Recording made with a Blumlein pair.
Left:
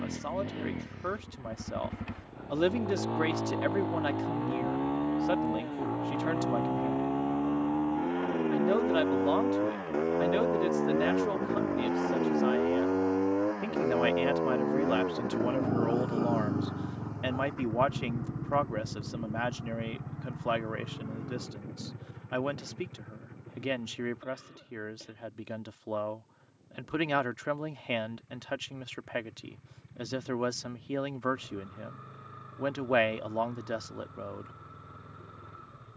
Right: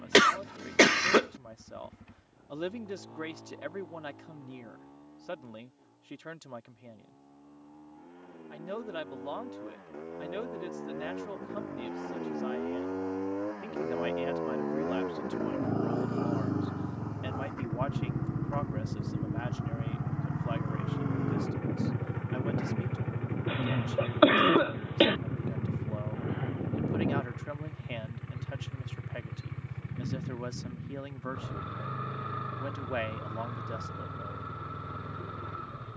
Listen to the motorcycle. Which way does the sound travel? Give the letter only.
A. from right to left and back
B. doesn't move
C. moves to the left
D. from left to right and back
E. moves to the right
E.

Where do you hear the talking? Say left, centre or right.
left.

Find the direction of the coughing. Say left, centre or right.
right.